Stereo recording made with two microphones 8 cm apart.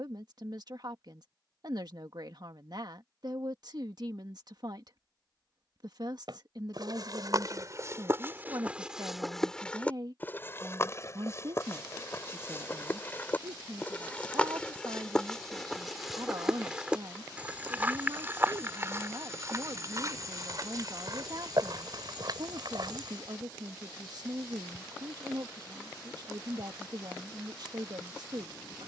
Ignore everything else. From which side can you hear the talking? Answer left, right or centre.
right.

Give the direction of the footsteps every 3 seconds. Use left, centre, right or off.
off, off, right, left, left, centre, right, right, off, off.